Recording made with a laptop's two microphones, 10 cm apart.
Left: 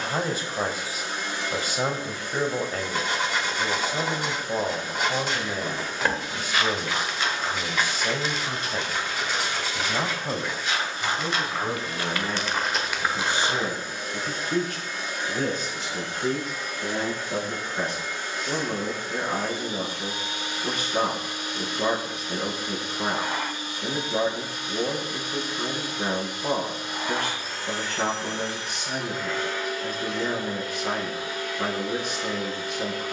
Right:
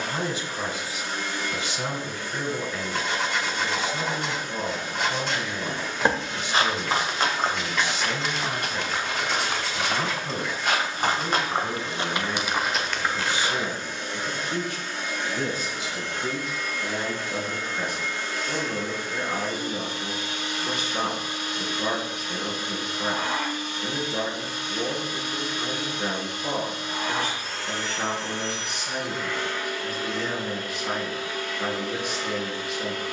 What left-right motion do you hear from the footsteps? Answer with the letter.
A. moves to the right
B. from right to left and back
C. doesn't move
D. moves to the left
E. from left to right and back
E.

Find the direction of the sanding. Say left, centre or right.
centre.